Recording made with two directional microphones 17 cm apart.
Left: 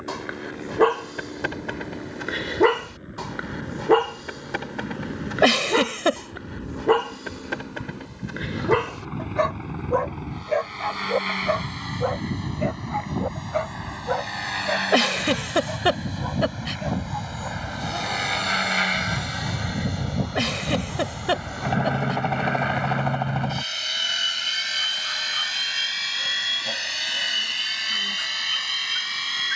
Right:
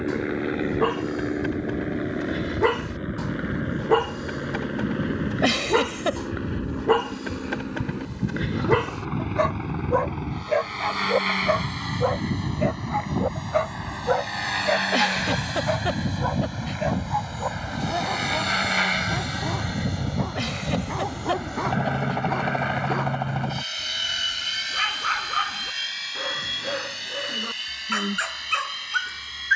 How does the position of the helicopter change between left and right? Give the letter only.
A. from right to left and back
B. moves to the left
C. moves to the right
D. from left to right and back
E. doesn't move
B.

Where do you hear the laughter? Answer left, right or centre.
left.